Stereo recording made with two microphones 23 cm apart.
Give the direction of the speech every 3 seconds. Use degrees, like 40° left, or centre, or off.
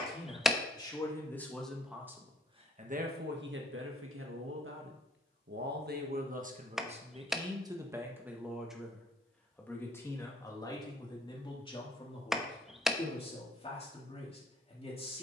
centre, 60° right, 20° right, 20° left, 30° left.